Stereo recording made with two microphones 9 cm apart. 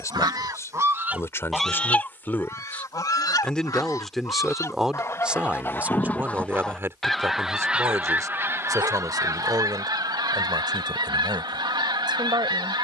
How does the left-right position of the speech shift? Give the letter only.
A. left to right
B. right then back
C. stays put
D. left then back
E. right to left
A.